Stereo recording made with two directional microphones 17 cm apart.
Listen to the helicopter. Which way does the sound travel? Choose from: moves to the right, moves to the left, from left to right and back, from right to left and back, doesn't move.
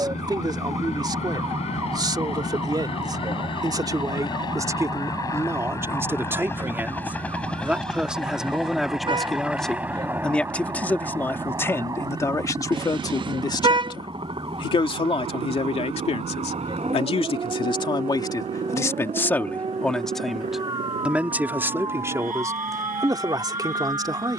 moves to the right.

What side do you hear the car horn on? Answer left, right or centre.
right.